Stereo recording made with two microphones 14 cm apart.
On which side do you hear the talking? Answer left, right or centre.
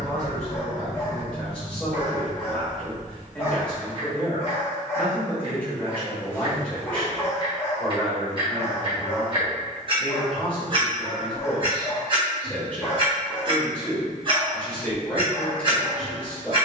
centre.